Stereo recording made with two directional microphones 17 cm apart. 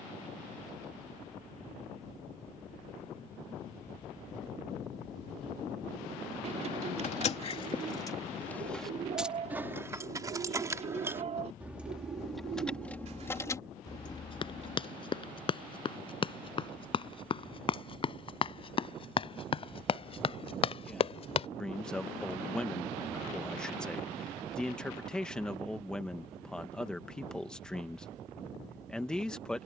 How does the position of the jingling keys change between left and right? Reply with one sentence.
In this clip you hear the jingling keys move from left to right and back again.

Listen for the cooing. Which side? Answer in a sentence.
In this clip you hear the cooing on the right.